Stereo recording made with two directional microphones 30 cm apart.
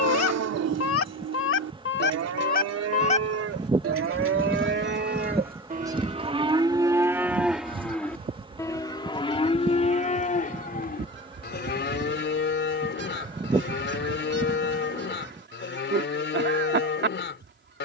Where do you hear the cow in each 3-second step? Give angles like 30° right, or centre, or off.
60° right, 40° right, centre, 30° left, 40° left, 40° left.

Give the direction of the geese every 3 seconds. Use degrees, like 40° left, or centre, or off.
40° left, centre, 20° right, 40° right, 40° right, 40° right.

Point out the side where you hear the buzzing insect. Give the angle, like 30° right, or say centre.
20° right.